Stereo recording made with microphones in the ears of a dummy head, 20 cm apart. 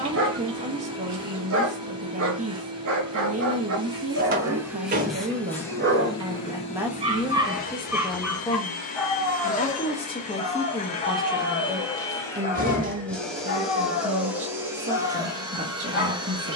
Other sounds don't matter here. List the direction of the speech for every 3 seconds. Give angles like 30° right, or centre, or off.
30° right, 30° right, centre, 10° left, 30° right, 30° right.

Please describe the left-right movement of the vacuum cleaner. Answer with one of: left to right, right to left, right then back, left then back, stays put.
left then back.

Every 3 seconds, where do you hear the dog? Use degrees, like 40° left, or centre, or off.
60° right, 60° right, 20° right, 30° left, 50° left, 50° left.